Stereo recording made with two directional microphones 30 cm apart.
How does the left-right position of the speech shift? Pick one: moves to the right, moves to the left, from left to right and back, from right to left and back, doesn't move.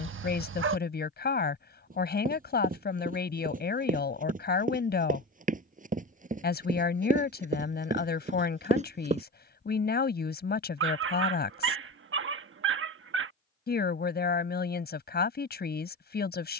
doesn't move.